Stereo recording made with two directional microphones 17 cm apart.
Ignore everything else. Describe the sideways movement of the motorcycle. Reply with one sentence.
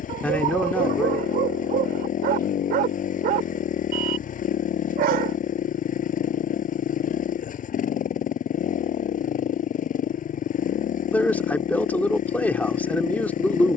In this clip you hear the motorcycle stay put.